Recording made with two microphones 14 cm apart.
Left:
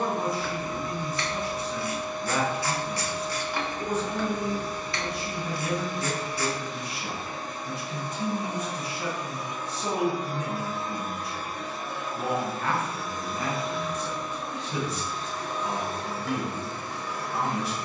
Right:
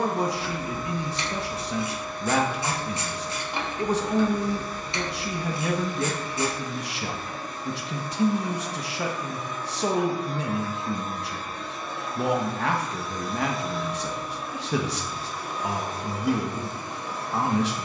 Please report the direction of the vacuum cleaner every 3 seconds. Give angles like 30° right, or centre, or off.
20° left, 20° left, 20° left, 10° left, centre, 20° right.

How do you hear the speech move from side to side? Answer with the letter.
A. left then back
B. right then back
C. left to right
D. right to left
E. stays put
E.